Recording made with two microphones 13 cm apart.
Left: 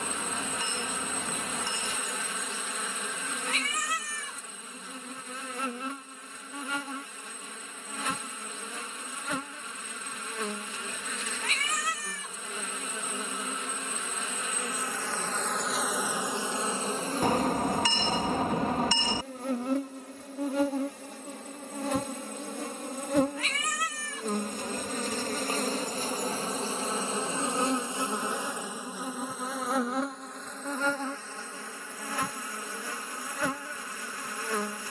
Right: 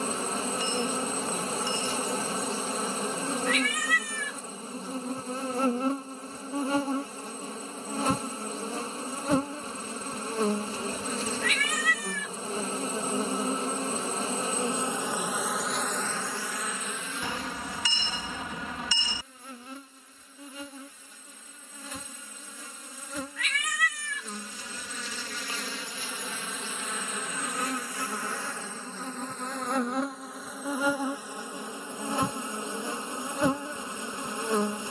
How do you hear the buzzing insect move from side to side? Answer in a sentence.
In this clip you hear the buzzing insect move from right to left and back again.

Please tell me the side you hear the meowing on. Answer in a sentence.
In this clip you hear the meowing on the left.